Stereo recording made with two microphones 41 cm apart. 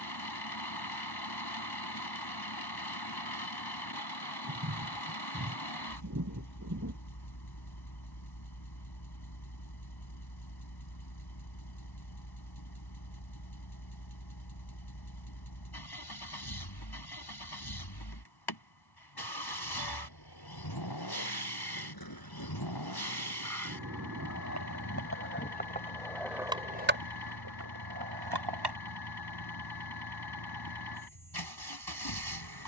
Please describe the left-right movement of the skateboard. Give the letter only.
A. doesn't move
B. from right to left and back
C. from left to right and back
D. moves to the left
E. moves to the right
E.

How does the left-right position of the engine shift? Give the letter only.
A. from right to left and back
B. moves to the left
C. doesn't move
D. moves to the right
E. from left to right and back
C.